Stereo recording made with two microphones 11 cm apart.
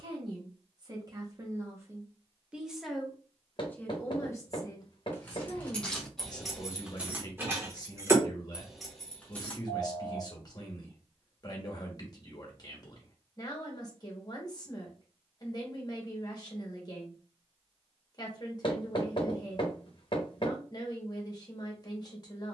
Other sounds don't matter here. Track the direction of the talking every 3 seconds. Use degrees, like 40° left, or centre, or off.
30° right, 30° left, 40° left, 40° left, 40° left, 40° left, 40° left, 40° left.